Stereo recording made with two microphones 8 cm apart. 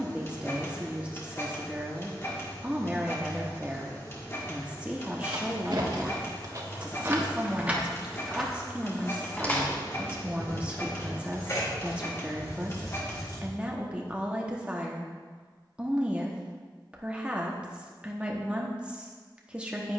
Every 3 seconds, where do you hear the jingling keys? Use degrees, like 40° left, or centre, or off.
off, 60° right, 20° right, 30° left, 50° left, off, off.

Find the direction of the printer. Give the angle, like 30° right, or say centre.
30° left.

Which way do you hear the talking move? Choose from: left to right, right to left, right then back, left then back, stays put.
stays put.